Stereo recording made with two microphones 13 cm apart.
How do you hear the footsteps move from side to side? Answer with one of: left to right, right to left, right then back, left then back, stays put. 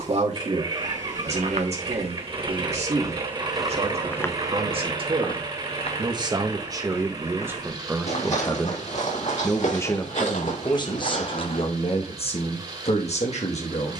right to left.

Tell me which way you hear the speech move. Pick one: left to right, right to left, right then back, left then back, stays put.
right to left.